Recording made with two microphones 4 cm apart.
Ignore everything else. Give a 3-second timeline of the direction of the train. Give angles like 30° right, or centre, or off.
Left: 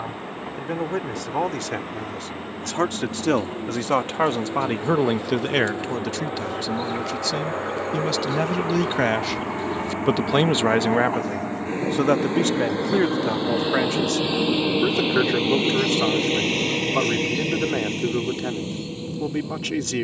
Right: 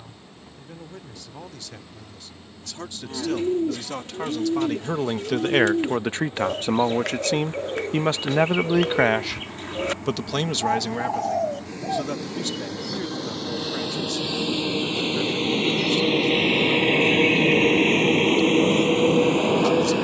50° left, 50° left, 50° left, 40° left, 20° left, 10° right, 60° right.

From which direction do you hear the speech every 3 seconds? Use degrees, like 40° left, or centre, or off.
70° left, 30° left, 40° right, 20° left, 60° left, 70° left, 70° left.